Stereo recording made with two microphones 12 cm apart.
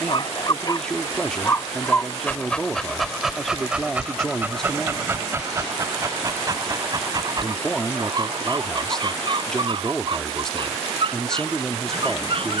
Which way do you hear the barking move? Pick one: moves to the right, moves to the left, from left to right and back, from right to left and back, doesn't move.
moves to the right.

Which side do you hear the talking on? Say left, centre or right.
centre.